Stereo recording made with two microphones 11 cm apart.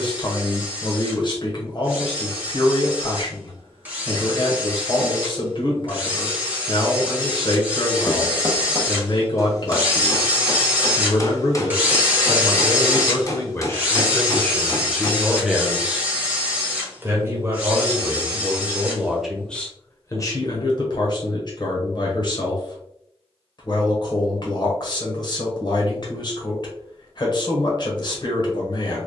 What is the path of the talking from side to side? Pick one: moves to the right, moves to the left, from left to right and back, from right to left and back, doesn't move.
from left to right and back.